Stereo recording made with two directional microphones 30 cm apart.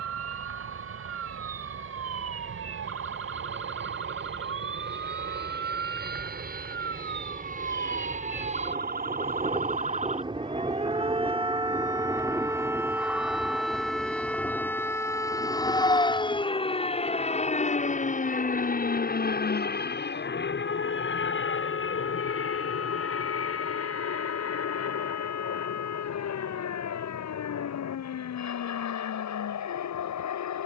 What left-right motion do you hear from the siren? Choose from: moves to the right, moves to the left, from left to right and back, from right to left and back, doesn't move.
moves to the left.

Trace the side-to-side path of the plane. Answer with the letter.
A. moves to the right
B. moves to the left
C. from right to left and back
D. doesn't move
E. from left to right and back
B.